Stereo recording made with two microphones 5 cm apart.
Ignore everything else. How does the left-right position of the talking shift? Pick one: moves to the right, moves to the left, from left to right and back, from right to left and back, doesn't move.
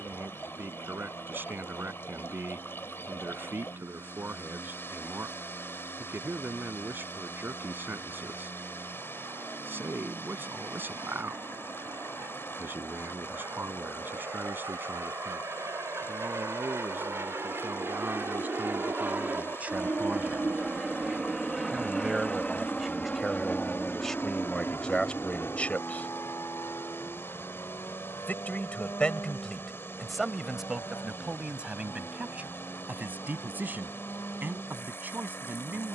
from right to left and back.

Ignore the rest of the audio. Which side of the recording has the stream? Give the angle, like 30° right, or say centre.
50° left.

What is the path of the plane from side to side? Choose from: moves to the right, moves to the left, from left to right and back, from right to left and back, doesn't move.
moves to the left.